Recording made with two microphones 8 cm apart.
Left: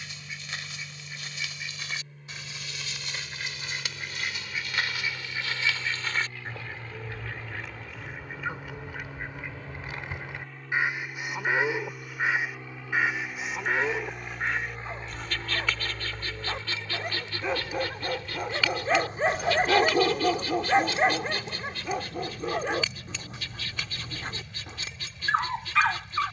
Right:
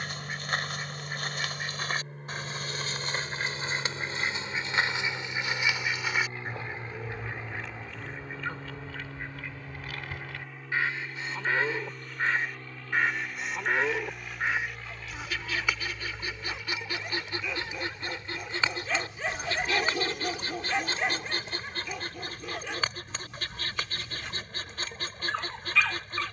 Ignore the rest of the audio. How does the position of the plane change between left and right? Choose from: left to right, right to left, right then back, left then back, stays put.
right to left.